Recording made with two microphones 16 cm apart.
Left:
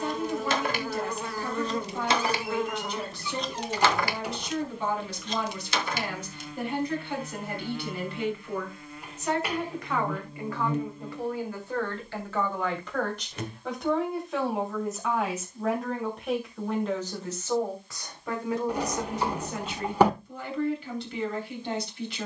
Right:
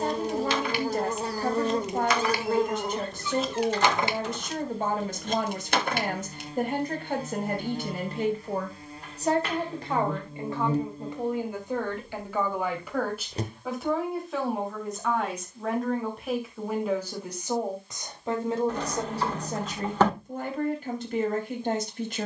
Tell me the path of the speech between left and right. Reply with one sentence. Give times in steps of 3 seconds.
In this clip you hear the speech on the right from 0 s, in the centre from 12 s and on the right from 18 s.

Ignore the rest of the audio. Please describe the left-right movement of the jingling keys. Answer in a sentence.
You can hear the jingling keys move from left to right.